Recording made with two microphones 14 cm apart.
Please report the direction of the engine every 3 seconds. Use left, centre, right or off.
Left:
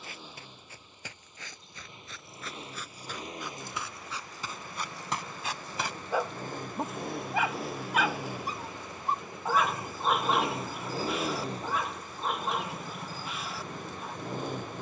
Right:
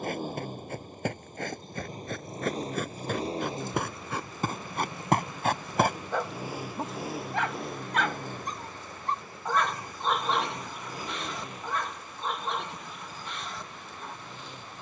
right, right, centre, left, left.